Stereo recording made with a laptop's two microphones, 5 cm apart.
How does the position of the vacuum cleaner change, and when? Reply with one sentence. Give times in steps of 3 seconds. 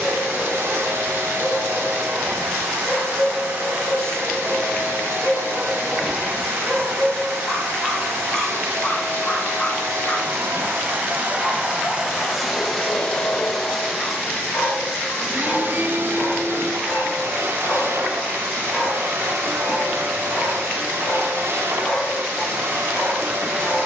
In this clip you hear the vacuum cleaner on the right from 0 s, in the centre from 12 s and on the right from 15 s.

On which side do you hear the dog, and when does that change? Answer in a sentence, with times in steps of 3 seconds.
You can hear the dog on the left from 0 s, in the centre from 3 s and on the left from 9 s.